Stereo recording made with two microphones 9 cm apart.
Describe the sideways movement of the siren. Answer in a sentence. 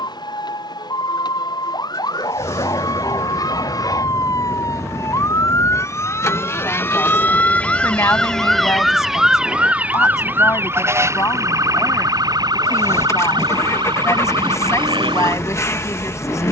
You can hear the siren move from left to right.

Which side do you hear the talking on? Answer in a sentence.
You can hear the talking on the left.